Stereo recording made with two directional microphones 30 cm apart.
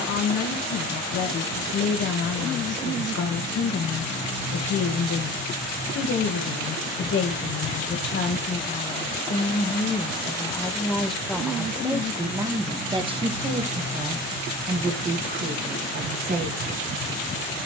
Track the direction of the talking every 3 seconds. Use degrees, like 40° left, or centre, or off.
60° left, 60° left, 40° left, 10° left, 20° right, 30° right.